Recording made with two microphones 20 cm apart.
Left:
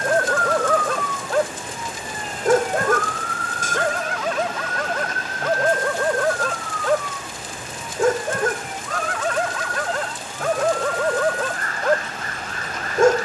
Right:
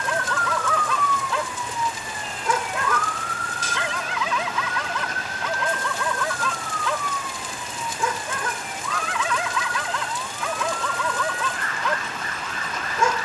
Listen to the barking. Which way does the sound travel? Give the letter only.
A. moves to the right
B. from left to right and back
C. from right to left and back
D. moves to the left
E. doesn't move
E.